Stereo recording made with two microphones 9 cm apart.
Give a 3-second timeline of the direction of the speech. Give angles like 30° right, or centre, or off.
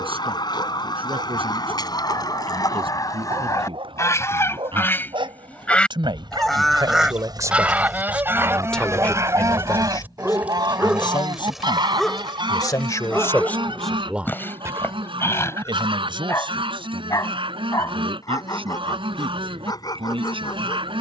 80° right, 70° right, 30° right, 50° left, 10° left, 60° right, 70° right.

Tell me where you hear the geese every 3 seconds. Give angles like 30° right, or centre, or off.
50° left, 30° left, 10° right, 50° right, 60° right, 70° right, 70° right.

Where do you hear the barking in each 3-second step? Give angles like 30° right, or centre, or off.
70° right, 70° right, 50° right, 10° right, 10° left, 30° left, 40° left.